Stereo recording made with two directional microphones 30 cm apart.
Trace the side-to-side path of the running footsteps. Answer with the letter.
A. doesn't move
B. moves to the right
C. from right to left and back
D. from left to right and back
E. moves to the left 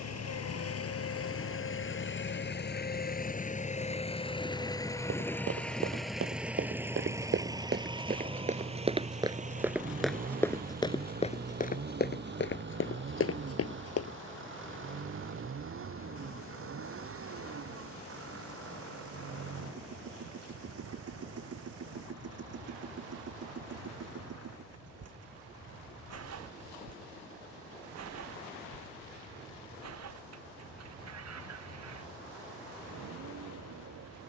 E.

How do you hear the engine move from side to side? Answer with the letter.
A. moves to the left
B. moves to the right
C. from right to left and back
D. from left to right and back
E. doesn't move
B.